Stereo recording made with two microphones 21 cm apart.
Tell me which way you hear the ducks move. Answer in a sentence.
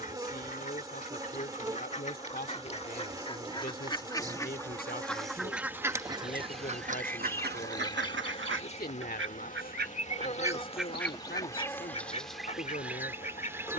In this clip you hear the ducks go right and come back.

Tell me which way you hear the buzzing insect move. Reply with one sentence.
You can hear the buzzing insect go left and come back.